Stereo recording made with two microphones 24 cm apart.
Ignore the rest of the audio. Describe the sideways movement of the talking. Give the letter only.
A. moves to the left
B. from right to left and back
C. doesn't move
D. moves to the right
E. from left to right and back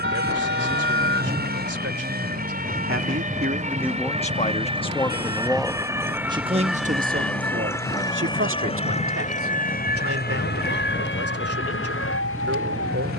B.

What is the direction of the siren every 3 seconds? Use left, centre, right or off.
right, right, centre, left, left.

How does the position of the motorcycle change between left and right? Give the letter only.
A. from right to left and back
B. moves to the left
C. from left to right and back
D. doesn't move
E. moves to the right
D.